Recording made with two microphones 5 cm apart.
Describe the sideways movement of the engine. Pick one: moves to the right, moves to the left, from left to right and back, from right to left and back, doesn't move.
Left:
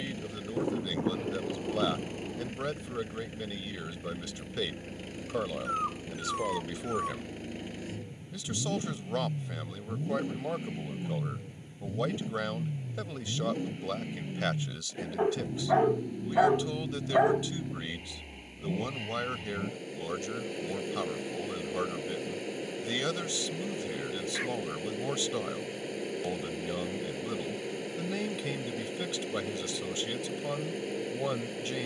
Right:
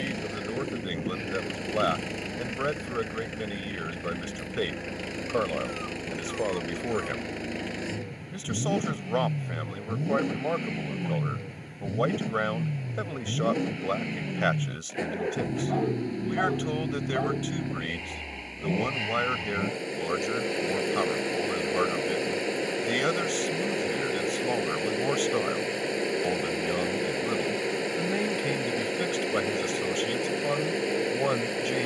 doesn't move.